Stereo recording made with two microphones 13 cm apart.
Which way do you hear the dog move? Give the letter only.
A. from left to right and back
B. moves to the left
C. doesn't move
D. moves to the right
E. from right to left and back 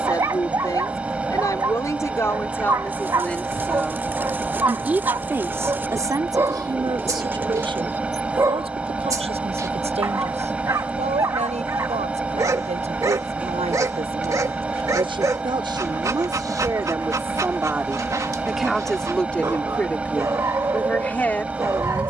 C.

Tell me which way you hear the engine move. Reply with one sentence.
In this clip you hear the engine stay in one place.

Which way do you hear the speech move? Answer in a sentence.
In this clip you hear the speech move from left to right and back again.